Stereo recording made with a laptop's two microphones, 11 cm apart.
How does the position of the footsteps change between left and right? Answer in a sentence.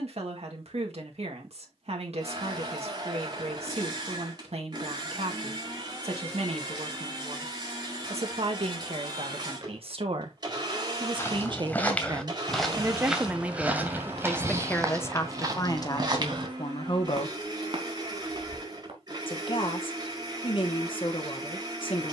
In this clip you hear the footsteps move from left to right.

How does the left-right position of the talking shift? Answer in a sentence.
In this clip you hear the talking go from the right side to the left.